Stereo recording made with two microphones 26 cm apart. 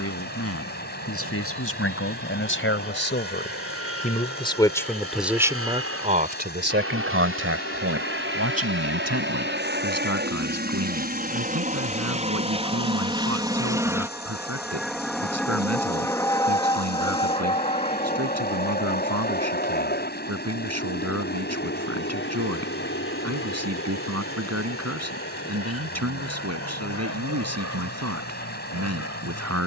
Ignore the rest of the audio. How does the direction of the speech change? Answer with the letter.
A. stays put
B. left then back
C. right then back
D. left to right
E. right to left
D.